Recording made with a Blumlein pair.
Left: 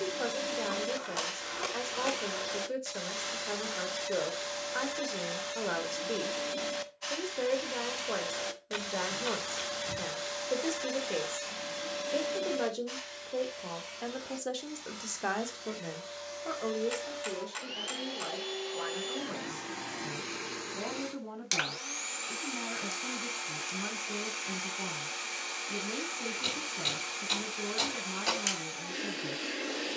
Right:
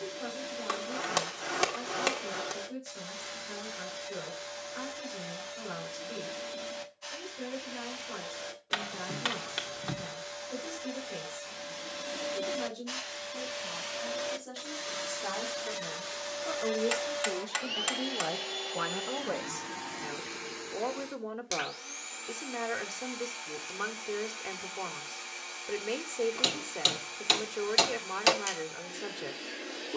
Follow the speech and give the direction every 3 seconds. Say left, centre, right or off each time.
left, left, left, left, left, centre, right, right, right, right.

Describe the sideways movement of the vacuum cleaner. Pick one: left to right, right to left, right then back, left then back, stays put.
right then back.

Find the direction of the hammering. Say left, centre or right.
right.